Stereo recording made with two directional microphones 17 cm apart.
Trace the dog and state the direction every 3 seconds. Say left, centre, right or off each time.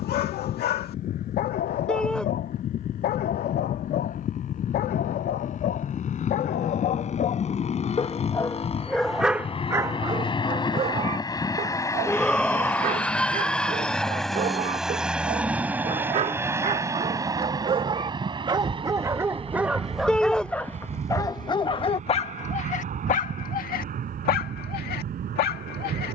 left, left, left, right, right, right, centre, left, left.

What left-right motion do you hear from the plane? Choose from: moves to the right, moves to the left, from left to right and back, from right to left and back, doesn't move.
moves to the right.